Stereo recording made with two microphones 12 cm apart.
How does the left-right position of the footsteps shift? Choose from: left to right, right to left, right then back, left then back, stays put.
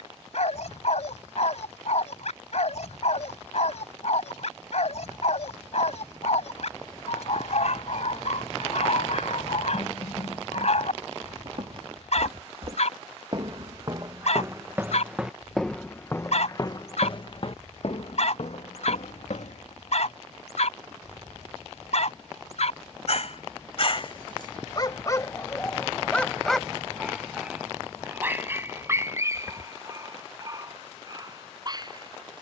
right to left.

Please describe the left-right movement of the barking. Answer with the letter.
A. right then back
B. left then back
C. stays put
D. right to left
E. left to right
E.